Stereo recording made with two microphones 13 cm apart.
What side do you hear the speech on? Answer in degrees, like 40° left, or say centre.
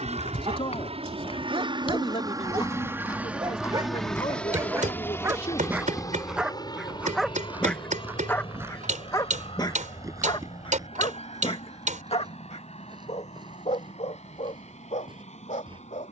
50° left.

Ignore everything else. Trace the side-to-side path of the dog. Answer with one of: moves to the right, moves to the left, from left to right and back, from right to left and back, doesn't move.
moves to the left.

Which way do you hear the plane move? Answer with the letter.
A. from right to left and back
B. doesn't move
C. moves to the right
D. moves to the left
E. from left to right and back
D.